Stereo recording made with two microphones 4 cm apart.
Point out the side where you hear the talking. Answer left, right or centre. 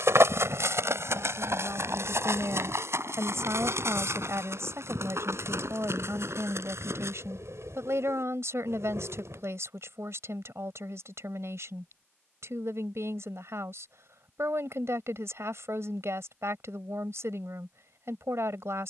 right.